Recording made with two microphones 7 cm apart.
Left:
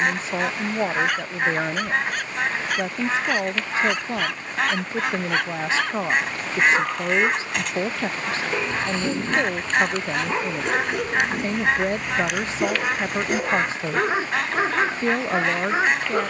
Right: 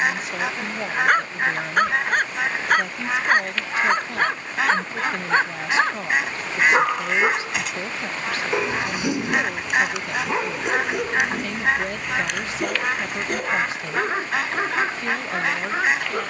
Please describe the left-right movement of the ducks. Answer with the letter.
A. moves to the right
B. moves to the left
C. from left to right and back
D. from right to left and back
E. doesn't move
E.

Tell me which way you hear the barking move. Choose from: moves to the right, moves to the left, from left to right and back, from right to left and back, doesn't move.
moves to the left.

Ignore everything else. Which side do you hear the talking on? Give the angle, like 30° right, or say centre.
30° left.